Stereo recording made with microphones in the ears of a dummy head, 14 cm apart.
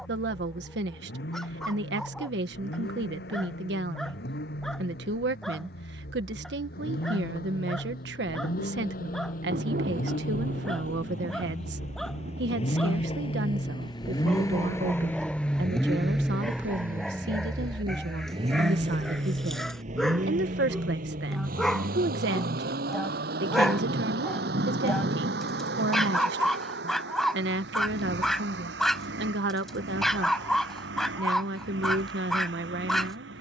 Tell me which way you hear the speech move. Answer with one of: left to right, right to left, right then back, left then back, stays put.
stays put.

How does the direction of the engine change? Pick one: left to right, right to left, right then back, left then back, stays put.
left to right.